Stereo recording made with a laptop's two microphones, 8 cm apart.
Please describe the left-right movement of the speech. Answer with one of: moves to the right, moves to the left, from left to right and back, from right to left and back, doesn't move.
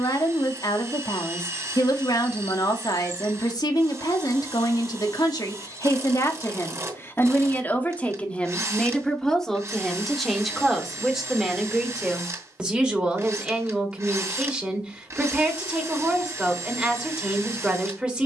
moves to the right.